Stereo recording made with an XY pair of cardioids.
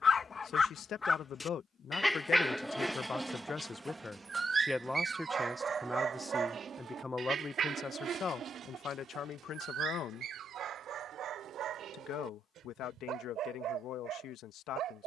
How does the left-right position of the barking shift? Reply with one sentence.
You can hear the barking move to the right.